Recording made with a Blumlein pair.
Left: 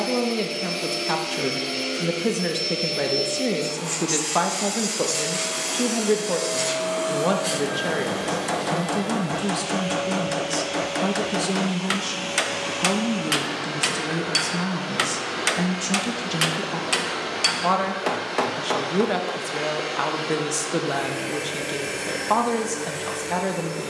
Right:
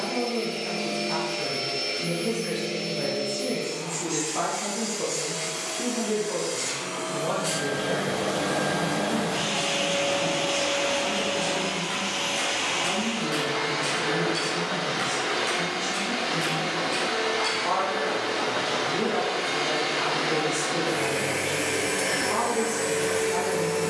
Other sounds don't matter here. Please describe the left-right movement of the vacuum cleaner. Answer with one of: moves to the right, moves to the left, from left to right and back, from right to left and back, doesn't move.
moves to the right.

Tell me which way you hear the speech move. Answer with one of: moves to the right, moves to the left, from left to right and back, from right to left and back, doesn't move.
doesn't move.